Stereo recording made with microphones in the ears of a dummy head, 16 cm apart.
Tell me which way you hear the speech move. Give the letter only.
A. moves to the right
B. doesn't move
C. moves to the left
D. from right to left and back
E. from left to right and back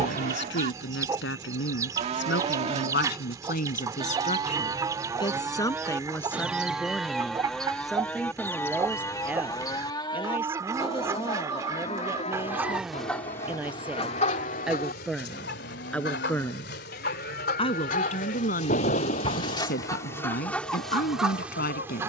E.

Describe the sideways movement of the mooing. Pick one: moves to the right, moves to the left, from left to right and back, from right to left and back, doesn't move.
moves to the left.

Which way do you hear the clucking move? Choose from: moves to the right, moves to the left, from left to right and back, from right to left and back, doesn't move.
from right to left and back.